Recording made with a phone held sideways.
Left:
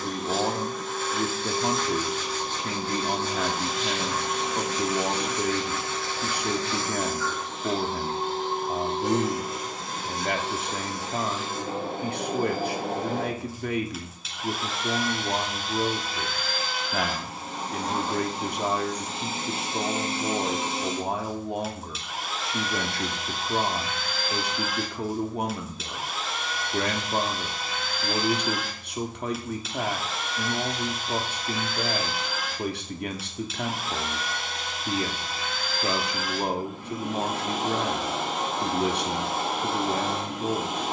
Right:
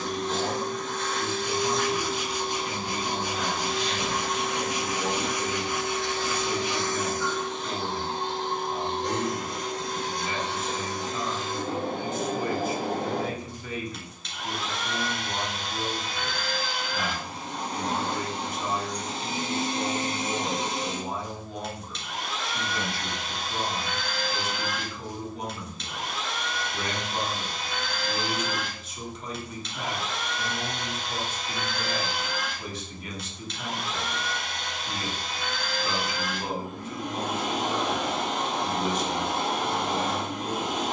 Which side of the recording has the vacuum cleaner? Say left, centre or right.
centre.